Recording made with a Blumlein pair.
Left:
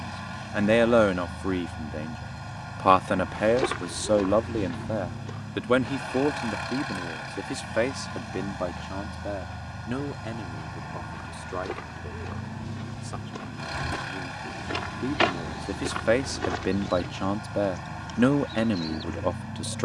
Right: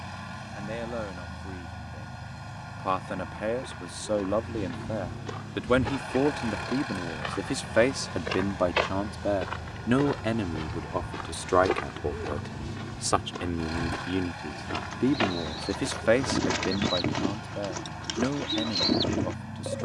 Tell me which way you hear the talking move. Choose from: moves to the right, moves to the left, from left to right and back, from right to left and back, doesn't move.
from left to right and back.